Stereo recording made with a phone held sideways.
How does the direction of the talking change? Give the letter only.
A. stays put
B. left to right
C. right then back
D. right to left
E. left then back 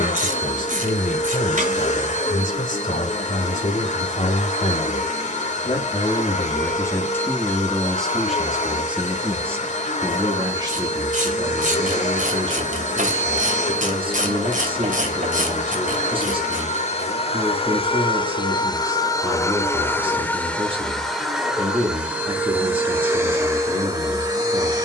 B.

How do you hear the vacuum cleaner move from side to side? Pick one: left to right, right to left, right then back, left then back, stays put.
left to right.